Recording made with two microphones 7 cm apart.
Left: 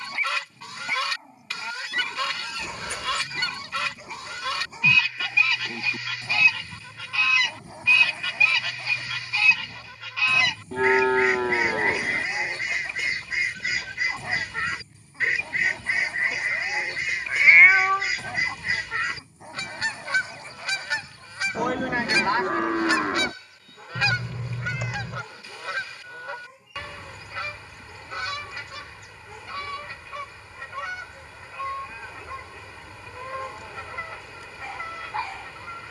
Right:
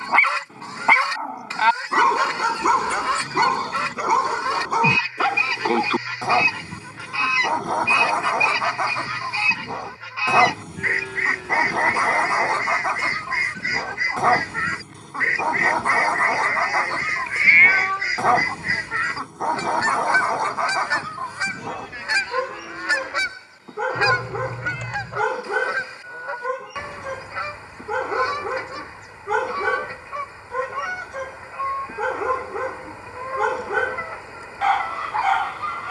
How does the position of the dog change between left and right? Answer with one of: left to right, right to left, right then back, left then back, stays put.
stays put.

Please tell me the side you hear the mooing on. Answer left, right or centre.
left.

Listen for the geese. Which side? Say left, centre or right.
right.